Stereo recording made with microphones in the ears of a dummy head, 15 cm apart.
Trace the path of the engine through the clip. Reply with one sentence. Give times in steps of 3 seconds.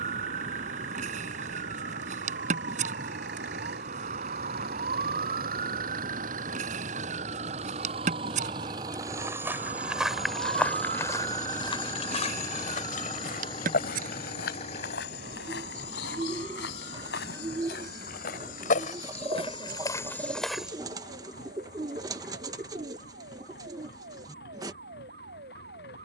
You can hear the engine on the right from 0 s, in the centre from 9 s and on the left from 12 s.